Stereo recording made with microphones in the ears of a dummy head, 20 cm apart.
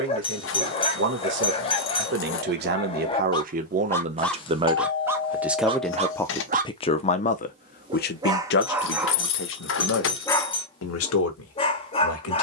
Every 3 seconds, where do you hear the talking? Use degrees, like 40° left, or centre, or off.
50° right, 20° right, 40° left, 70° left.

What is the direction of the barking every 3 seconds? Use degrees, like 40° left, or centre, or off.
30° left, centre, 20° right, 10° left.